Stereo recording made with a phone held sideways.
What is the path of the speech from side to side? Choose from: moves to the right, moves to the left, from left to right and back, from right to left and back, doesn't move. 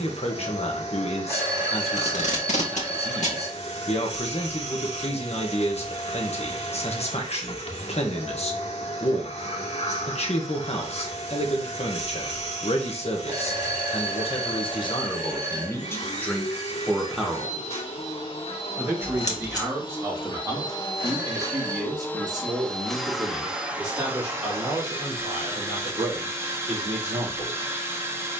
moves to the right.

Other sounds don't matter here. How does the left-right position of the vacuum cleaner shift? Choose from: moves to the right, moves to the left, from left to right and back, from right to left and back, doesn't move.
moves to the right.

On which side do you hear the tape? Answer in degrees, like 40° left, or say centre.
60° left.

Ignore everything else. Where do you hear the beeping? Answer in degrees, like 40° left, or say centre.
30° right.